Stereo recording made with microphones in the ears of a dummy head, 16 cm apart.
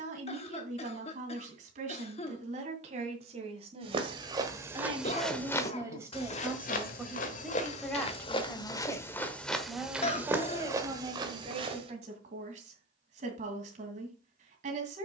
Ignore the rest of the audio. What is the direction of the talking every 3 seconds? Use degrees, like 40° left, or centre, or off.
40° right, 30° right, centre, 20° right, 40° right.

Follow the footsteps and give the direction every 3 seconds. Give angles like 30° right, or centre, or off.
off, 10° right, 40° left, 10° right, off.